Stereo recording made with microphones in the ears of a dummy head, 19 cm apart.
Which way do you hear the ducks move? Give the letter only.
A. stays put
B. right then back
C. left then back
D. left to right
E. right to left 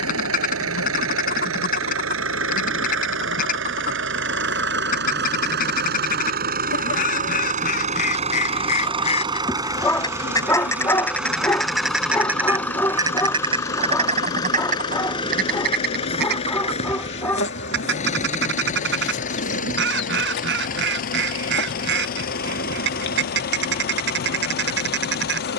D.